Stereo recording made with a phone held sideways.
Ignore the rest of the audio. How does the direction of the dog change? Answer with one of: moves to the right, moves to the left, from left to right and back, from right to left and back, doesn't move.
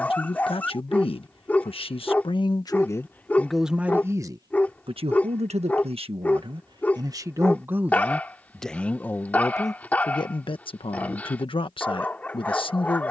doesn't move.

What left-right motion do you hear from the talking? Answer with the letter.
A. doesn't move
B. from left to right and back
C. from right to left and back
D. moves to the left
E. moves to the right
B.